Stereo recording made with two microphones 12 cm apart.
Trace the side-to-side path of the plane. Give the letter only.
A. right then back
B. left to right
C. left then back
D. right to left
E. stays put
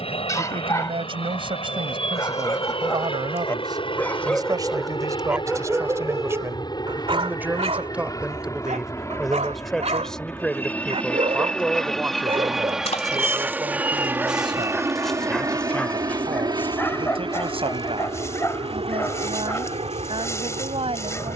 B.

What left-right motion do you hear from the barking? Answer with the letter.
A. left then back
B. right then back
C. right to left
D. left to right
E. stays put
B.